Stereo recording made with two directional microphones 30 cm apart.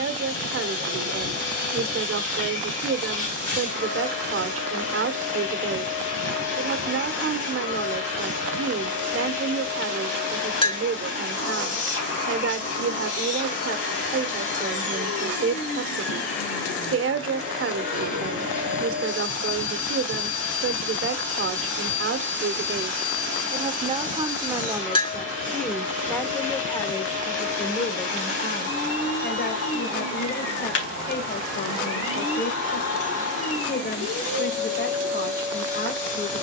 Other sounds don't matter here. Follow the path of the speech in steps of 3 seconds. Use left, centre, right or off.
right, right, right, right, right, right, right, right, centre, left, left, left.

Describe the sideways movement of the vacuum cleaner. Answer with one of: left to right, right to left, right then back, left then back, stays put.
stays put.